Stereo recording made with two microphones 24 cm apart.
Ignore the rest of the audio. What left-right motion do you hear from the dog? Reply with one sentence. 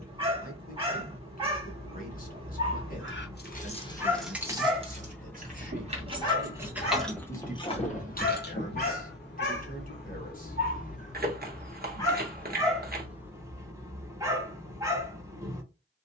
In this clip you hear the dog move from right to left and back again.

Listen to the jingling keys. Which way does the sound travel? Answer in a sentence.
In this clip you hear the jingling keys go right and come back.